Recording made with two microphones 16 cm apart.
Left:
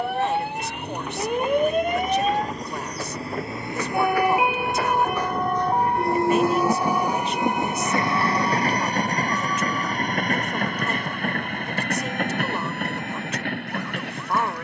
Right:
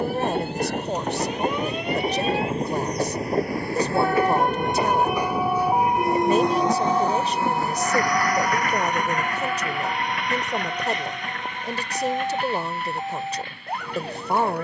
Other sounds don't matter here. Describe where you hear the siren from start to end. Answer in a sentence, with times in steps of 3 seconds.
You can hear the siren on the left from 0 s, in the centre from 3 s and on the right from 6 s.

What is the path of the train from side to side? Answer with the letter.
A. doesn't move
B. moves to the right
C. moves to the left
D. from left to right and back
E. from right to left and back
C.